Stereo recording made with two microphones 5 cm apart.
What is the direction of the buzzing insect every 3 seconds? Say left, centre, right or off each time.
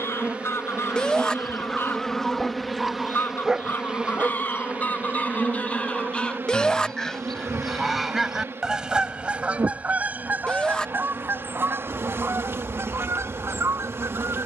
centre, right, right, right, right.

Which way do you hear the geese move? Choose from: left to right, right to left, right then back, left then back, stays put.
left to right.